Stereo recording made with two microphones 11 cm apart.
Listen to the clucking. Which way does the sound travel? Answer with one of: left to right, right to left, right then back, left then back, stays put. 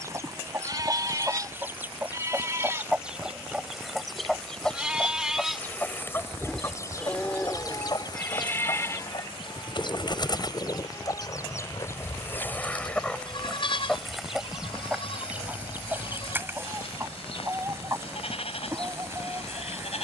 left then back.